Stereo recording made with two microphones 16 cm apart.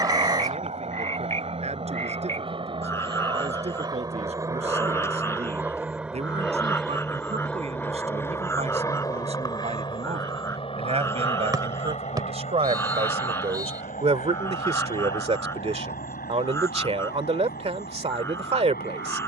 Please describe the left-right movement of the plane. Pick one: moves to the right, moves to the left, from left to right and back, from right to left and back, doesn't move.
moves to the left.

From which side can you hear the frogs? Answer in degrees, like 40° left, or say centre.
20° left.